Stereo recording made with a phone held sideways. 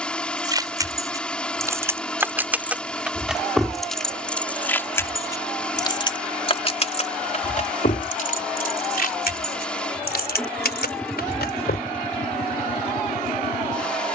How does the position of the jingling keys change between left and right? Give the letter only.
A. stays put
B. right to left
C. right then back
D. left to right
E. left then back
B.